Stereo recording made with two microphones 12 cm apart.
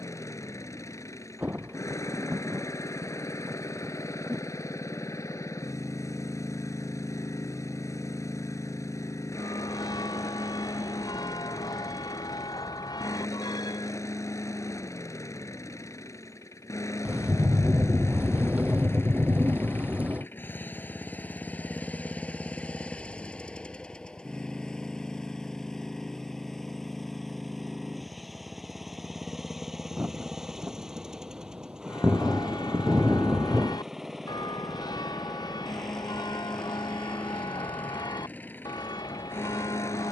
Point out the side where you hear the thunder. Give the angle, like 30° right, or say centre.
10° right.